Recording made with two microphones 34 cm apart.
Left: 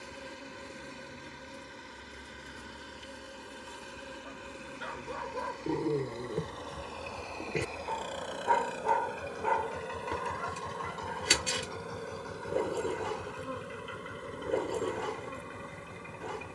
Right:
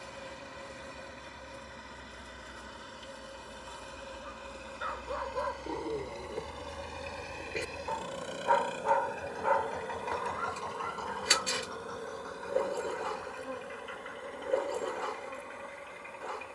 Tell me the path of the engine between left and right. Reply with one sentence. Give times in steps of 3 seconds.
You can hear the engine on the right from 0 s and on the left from 9 s.